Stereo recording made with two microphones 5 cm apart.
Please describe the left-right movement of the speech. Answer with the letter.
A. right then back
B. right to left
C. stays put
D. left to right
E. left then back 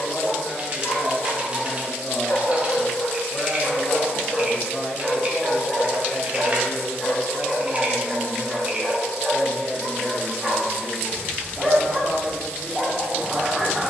D.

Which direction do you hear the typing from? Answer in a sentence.
In this clip you hear the typing on the right.